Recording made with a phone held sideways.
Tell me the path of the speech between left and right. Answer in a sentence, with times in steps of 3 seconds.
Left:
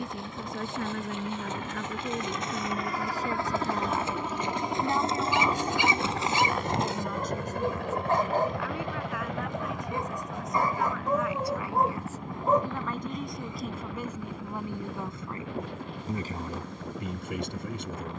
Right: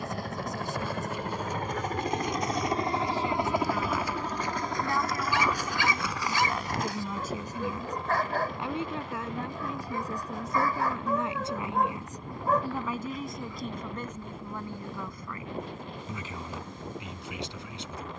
You can hear the speech on the left from 0 s, in the centre from 6 s, on the right from 9 s, in the centre from 12 s and on the left from 15 s.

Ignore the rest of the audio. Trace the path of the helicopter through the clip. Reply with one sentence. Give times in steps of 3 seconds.
In this clip you hear the helicopter on the right from 0 s, in the centre from 3 s and on the left from 6 s.